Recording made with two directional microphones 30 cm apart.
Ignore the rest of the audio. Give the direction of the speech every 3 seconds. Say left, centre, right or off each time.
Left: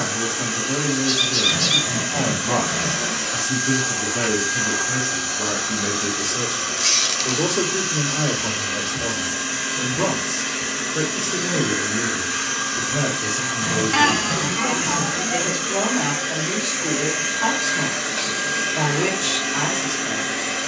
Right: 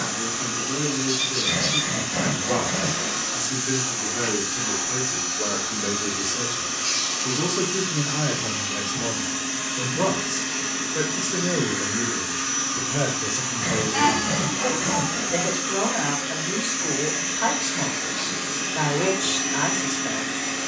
left, left, centre, centre, centre, centre, centre.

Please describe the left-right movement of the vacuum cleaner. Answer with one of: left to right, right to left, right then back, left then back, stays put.
stays put.